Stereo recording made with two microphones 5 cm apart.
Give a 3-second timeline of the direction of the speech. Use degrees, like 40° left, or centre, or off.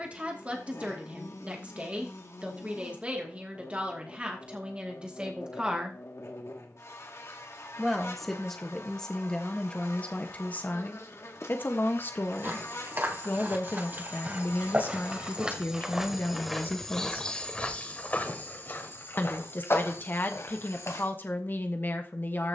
30° right, 20° right, centre, 30° left, 40° left, 40° left, 40° left, 40° left.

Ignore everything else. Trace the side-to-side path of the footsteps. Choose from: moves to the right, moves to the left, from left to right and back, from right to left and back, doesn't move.
moves to the left.